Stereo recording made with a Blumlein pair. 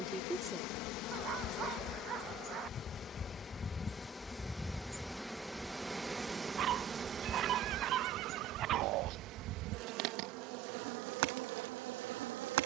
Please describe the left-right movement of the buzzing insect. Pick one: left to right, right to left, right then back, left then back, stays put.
left to right.